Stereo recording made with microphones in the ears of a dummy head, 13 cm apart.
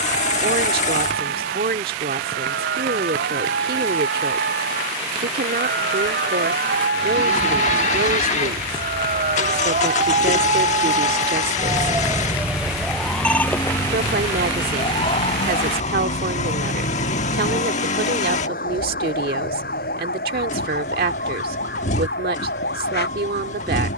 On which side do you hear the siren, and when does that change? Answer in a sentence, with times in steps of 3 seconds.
You can hear the siren on the right from 0 s, in the centre from 12 s and on the left from 15 s.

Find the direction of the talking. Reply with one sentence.
In this clip you hear the talking on the right.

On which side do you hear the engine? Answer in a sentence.
In this clip you hear the engine on the left.